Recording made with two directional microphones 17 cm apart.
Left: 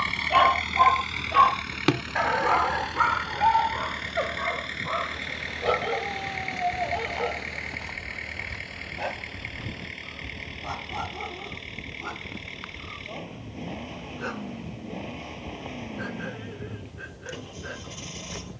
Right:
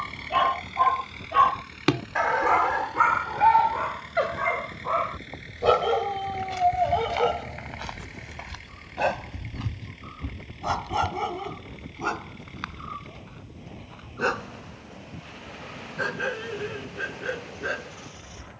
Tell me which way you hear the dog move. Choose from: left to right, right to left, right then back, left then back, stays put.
left to right.